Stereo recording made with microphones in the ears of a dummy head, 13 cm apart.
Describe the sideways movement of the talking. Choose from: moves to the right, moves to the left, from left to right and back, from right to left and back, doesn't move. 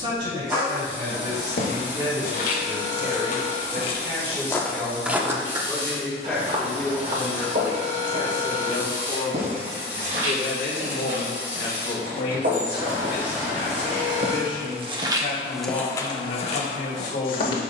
moves to the left.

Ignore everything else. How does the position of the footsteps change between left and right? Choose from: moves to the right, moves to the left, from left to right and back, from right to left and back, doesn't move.
from left to right and back.